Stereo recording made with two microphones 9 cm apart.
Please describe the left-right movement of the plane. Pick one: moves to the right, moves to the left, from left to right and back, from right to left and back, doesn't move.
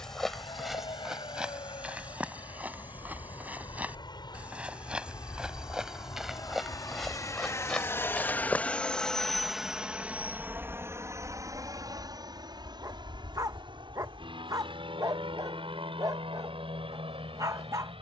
moves to the right.